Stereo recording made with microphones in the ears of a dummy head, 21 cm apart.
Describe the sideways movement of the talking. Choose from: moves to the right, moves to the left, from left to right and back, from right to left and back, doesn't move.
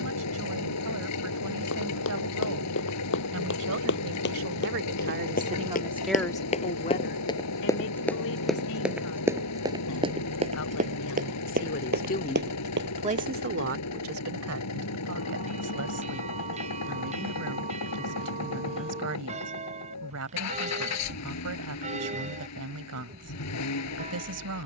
from right to left and back.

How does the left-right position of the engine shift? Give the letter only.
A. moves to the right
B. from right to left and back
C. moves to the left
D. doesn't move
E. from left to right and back
D.